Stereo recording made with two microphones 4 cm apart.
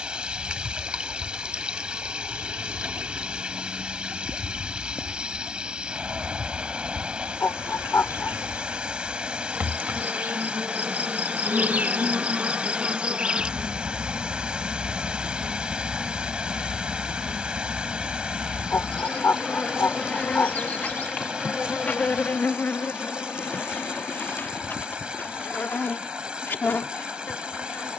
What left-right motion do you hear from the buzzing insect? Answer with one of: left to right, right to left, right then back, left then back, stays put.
right to left.